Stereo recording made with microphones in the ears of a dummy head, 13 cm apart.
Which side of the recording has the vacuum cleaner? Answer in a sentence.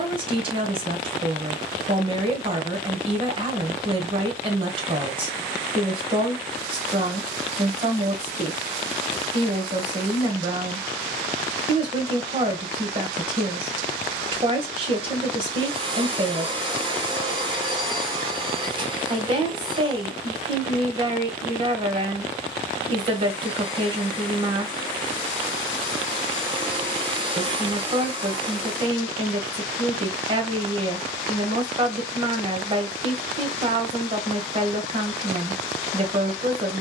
You can hear the vacuum cleaner on the right.